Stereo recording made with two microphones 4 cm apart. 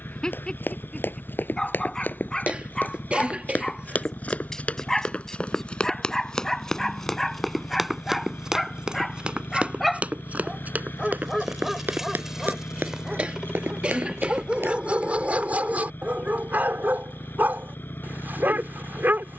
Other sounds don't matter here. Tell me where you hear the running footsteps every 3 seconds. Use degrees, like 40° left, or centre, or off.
50° left, 30° left, centre, 40° right, 60° right, off, off.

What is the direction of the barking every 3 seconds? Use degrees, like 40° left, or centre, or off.
20° left, 10° left, 10° left, centre, 20° right, 40° right, 50° right.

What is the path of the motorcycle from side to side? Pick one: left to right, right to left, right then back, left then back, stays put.
stays put.